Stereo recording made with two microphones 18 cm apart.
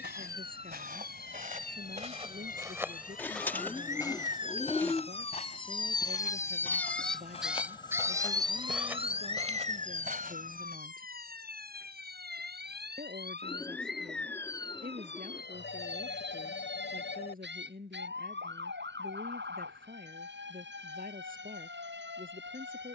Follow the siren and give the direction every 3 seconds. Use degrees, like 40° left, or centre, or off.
60° left, 40° left, centre, 50° right, 70° right, 80° right, 80° right, 80° right.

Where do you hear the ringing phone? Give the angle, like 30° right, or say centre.
80° left.